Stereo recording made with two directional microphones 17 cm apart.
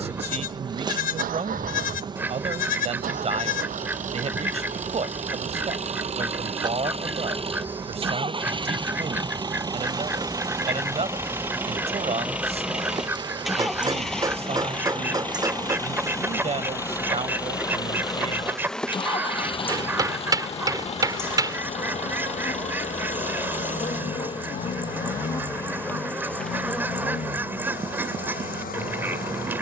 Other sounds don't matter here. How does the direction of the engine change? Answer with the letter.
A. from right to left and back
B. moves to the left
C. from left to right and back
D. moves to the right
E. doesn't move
B.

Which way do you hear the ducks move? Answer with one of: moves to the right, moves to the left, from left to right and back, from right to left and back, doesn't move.
doesn't move.